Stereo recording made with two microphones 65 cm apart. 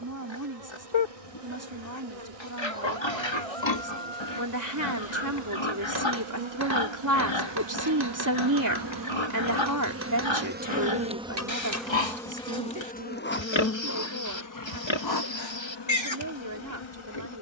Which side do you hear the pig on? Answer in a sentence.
In this clip you hear the pig on the left.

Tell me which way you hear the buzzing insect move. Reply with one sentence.
You can hear the buzzing insect move from right to left.